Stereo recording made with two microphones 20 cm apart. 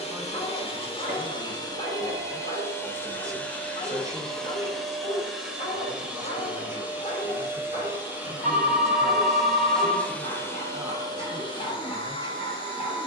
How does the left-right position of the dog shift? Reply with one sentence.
You can hear the dog stay in one place.